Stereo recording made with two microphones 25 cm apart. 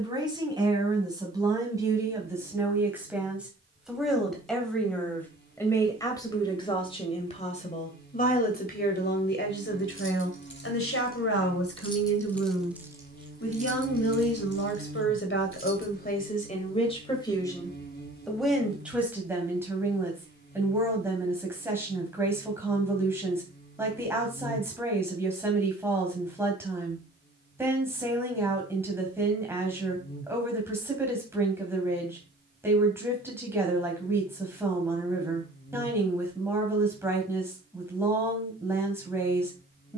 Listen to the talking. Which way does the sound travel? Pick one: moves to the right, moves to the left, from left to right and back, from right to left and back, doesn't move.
from right to left and back.